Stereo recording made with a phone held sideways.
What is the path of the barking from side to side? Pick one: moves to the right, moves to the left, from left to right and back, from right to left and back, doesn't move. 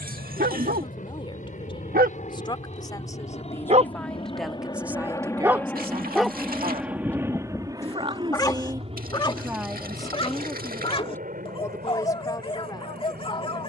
moves to the left.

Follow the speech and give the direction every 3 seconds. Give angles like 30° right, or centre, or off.
30° left, centre, 40° right, 10° left, 30° left.